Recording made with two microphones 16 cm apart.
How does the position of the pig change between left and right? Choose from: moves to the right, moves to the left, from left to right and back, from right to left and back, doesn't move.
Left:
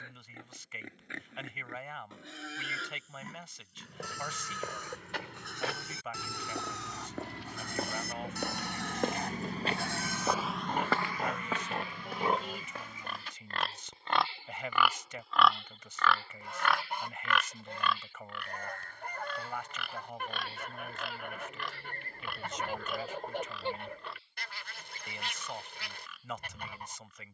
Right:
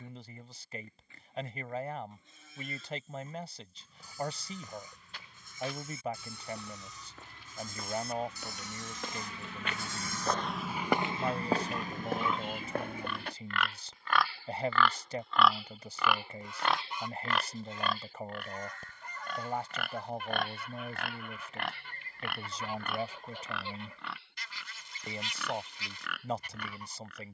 moves to the right.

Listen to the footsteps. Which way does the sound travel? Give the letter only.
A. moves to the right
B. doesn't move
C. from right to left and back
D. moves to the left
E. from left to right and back
A.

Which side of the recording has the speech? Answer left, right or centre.
right.